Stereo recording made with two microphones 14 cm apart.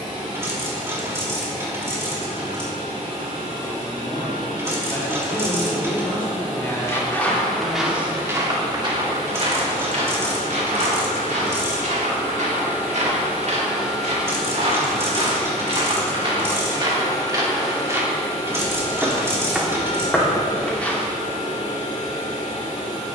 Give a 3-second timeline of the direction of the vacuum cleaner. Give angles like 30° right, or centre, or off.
50° right, 40° right, 40° right, 30° right, 10° right, 20° left, 50° left, 60° left.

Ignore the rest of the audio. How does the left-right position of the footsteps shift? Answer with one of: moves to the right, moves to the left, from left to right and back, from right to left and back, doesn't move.
from left to right and back.